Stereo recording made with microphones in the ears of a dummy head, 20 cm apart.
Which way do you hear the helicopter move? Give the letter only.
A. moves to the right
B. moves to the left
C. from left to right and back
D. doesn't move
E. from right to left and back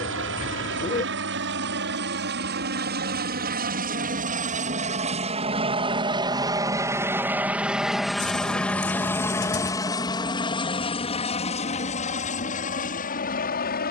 B.